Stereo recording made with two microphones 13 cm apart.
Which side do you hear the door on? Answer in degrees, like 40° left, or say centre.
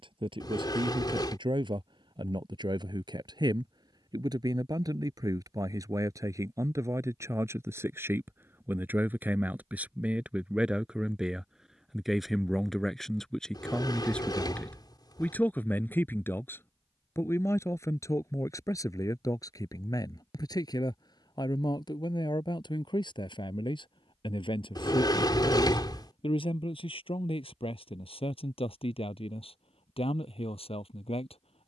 40° left.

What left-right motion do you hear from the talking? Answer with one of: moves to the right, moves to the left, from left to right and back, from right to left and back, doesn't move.
moves to the left.